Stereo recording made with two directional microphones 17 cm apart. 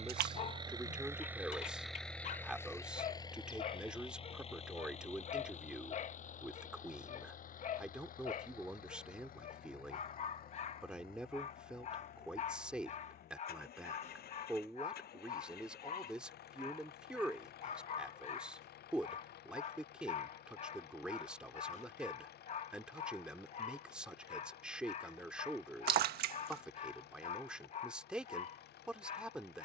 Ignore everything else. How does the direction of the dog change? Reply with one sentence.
You can hear the dog stay put.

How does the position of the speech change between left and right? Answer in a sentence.
In this clip you hear the speech stay put.